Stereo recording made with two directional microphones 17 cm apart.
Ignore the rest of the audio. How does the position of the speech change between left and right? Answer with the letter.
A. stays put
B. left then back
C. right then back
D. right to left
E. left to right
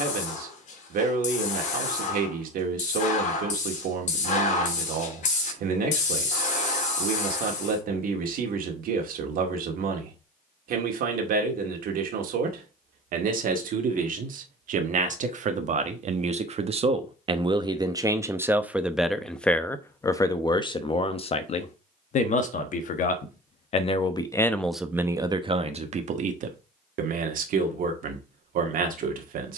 B.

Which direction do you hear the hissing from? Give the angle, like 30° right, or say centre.
50° left.